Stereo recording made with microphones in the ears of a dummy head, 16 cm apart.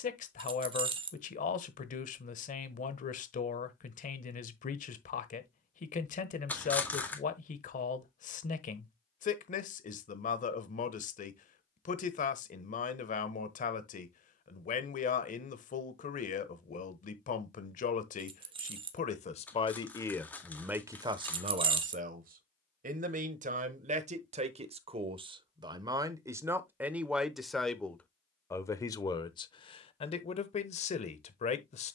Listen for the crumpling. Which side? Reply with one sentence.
In this clip you hear the crumpling in the centre.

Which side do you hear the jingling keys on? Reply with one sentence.
In this clip you hear the jingling keys on the right.